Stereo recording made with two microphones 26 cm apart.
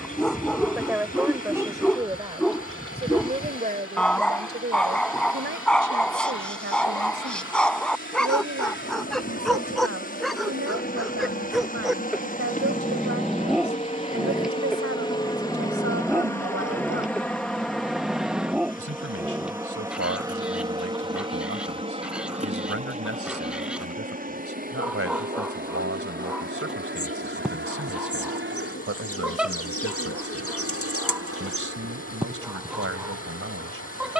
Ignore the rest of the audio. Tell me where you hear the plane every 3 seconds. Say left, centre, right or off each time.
left, left, left, left, left, centre, centre, right, right, right, right, right.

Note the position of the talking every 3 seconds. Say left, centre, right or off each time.
centre, right, right, right, right, right, right, right, right, right, right, right.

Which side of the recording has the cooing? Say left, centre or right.
left.